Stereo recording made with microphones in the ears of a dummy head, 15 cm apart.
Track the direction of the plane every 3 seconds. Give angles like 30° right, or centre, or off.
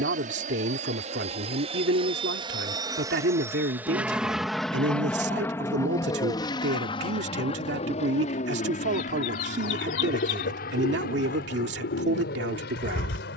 40° right, centre, 30° left, 50° left, 60° left.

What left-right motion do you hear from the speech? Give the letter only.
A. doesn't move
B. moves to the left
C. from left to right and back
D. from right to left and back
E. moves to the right
A.